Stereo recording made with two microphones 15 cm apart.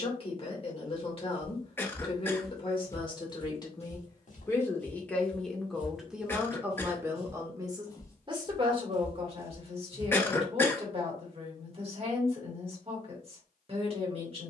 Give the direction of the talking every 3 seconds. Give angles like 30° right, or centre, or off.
40° left, 20° left, 20° right, 40° right, 40° right.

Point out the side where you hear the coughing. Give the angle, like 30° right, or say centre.
10° left.